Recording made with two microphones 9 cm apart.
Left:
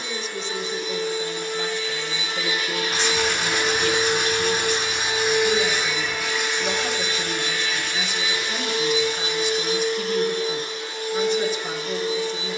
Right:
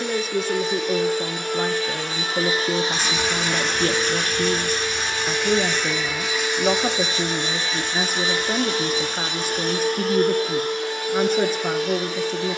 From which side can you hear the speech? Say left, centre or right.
right.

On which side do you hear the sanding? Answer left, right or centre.
centre.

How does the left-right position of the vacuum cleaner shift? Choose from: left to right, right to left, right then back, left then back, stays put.
left then back.